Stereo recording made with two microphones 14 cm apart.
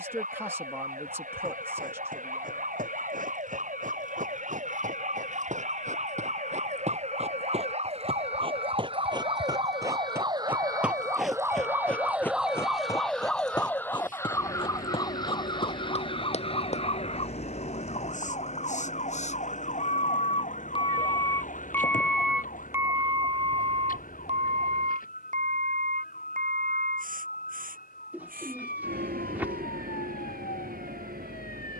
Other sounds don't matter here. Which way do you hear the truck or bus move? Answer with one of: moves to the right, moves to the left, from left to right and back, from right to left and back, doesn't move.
moves to the right.